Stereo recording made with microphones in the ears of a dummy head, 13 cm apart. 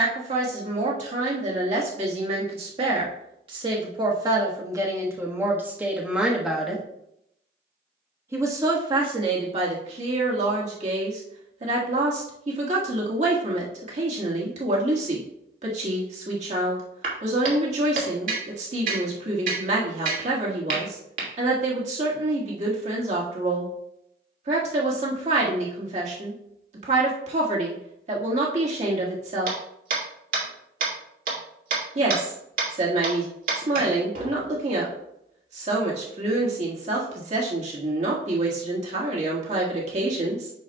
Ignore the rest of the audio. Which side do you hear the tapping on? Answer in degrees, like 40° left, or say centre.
60° right.